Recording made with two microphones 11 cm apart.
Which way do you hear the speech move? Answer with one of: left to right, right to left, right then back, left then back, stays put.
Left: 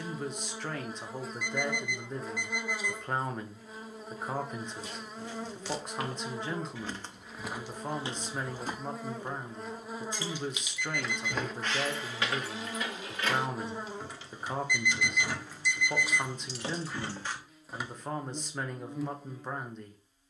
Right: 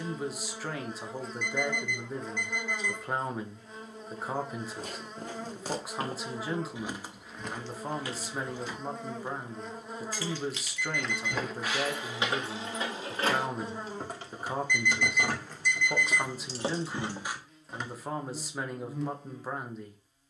stays put.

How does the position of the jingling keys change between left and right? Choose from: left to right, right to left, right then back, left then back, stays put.
right then back.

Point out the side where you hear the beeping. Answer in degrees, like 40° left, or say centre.
10° left.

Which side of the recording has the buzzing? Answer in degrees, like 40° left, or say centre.
centre.